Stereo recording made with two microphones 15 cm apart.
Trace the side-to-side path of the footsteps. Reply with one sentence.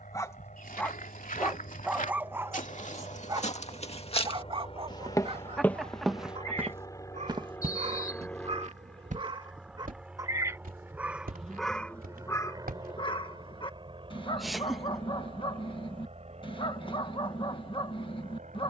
You can hear the footsteps travel towards the right.